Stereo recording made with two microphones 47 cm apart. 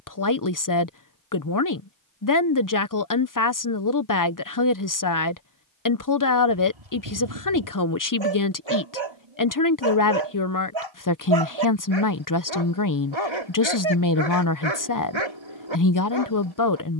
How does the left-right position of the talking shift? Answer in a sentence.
You can hear the talking stay put.